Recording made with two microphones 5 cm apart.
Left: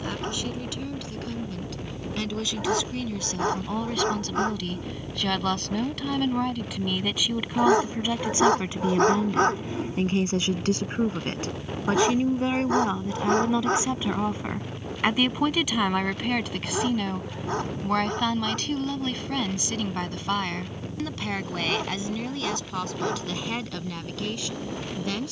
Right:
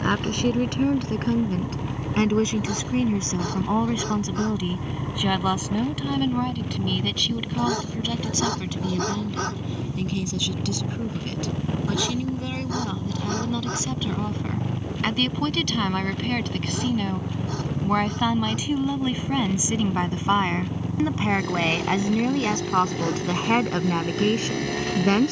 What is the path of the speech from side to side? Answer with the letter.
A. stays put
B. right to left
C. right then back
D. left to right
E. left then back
E.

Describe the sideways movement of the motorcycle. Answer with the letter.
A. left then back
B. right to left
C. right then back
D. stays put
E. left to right
D.